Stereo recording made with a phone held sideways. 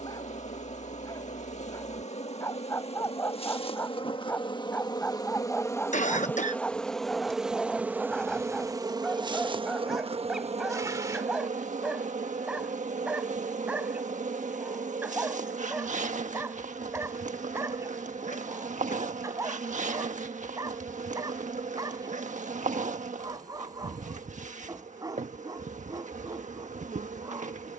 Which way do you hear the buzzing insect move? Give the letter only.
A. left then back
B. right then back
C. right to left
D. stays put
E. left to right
E.